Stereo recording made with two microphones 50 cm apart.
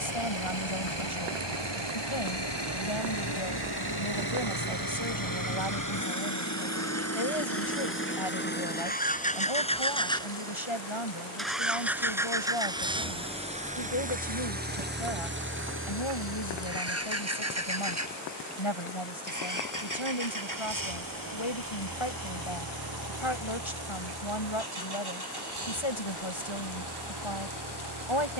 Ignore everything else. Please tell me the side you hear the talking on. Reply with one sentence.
In this clip you hear the talking on the left.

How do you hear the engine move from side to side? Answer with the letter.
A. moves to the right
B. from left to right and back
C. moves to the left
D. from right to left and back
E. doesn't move
A.